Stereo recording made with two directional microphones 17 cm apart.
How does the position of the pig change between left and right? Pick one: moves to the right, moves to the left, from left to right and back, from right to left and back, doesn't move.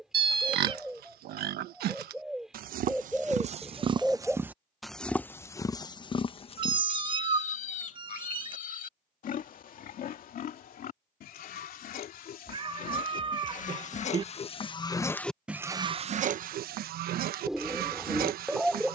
from right to left and back.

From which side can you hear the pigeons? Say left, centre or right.
centre.